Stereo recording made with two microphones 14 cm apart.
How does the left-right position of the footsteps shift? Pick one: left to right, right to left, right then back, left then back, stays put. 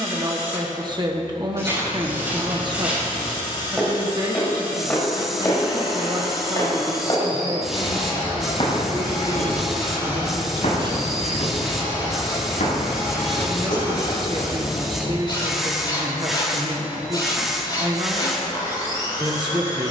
right to left.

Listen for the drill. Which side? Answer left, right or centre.
left.